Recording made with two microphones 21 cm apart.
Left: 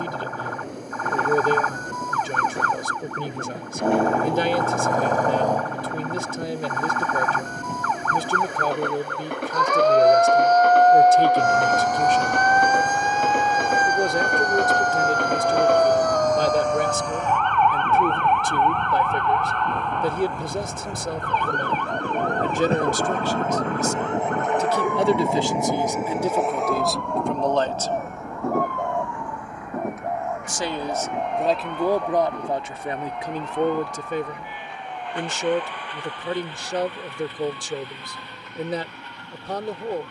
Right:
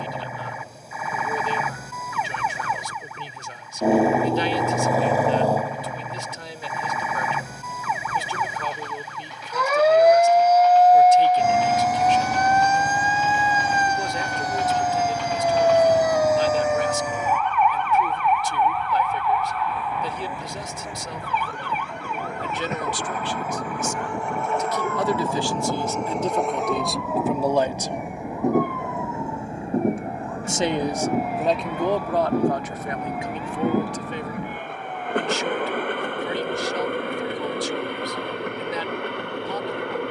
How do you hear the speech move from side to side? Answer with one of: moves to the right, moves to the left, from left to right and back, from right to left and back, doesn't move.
from left to right and back.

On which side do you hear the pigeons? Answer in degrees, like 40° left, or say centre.
80° left.